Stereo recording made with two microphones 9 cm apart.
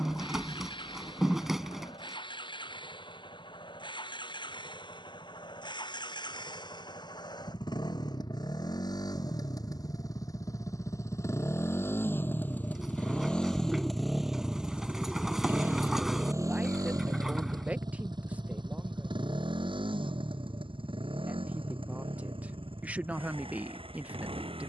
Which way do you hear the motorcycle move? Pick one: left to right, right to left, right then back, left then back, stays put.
left to right.